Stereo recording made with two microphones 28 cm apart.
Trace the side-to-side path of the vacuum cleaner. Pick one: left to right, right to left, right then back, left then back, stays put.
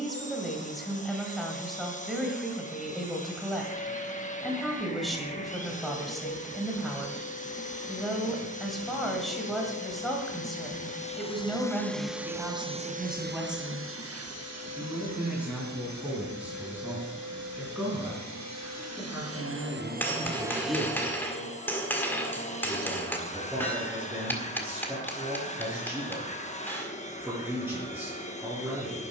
right then back.